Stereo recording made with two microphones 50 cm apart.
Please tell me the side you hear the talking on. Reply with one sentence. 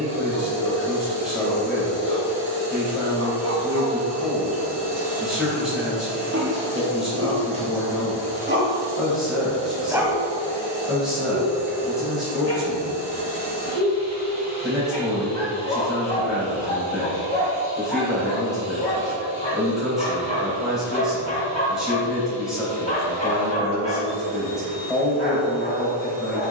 In this clip you hear the talking in the centre.